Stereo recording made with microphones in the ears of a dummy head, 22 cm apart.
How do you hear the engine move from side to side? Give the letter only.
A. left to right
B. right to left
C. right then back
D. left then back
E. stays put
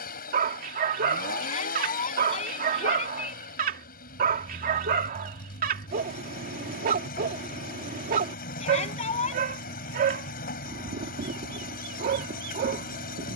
E.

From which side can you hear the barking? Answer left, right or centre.
right.